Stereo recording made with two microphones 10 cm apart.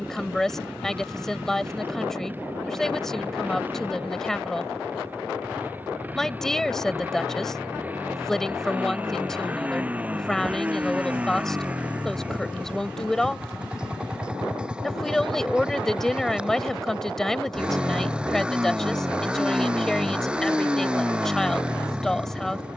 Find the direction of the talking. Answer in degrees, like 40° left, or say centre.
centre.